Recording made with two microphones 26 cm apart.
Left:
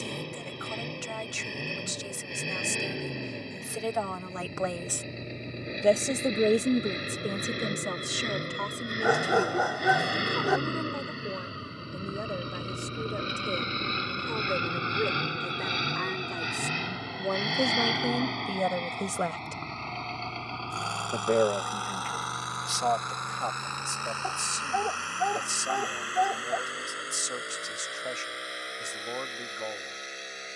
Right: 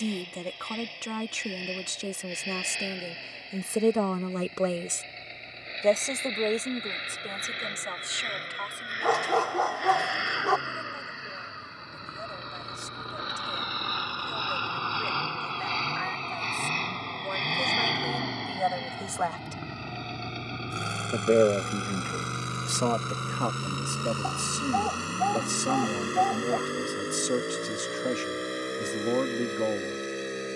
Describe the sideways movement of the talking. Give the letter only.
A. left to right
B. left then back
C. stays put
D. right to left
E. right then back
B.